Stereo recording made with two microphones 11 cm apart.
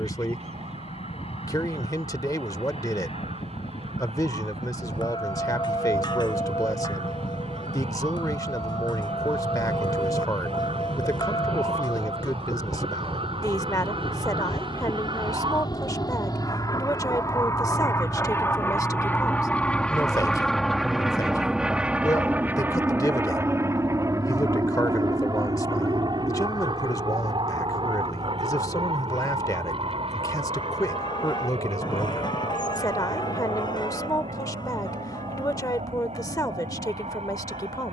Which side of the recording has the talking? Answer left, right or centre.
left.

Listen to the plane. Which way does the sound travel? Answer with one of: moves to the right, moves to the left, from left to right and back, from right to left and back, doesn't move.
moves to the right.